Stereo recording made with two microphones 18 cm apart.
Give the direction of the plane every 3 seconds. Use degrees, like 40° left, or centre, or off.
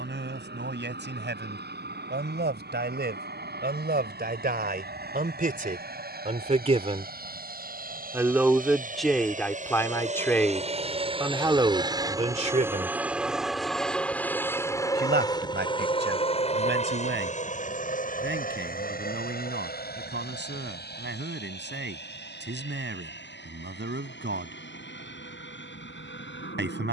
70° right, 70° right, 60° right, 40° right, centre, 30° left, 50° left, 60° left, 70° left.